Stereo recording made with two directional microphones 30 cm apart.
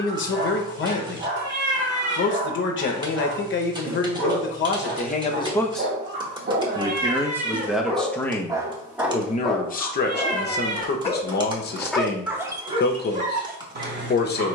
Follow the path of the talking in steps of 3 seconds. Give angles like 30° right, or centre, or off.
40° left, 30° left, centre, 30° left, 30° left.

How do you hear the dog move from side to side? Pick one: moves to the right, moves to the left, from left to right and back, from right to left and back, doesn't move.
from right to left and back.